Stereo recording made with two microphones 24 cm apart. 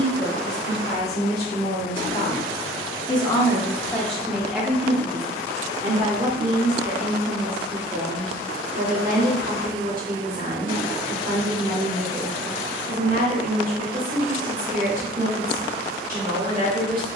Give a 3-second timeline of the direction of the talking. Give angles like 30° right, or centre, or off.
40° left, centre, 40° right, 40° right, 40° right, 40° right.